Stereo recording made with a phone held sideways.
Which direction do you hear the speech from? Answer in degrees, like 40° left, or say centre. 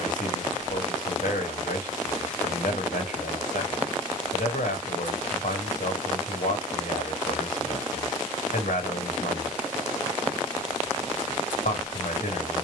70° left.